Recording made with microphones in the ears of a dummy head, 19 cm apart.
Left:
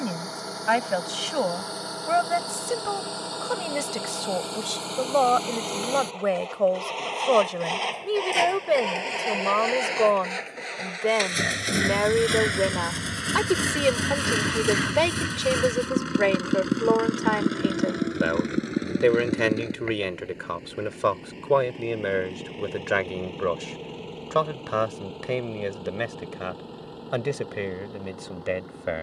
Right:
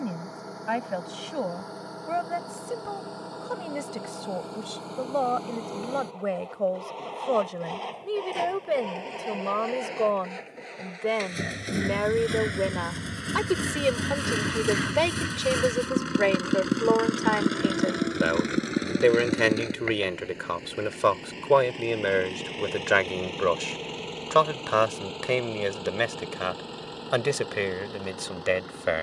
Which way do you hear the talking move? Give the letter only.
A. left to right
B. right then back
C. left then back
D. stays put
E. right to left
A.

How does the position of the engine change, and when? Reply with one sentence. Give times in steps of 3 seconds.
In this clip you hear the engine on the left from 0 s, in the centre from 15 s and on the right from 18 s.